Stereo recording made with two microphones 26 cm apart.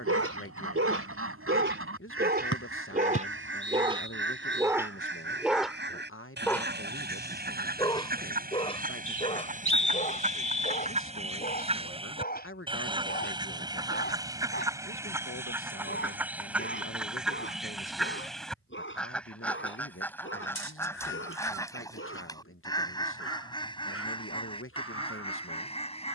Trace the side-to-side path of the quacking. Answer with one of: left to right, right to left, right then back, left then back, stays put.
right to left.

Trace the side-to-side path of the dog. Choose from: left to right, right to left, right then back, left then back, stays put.
right to left.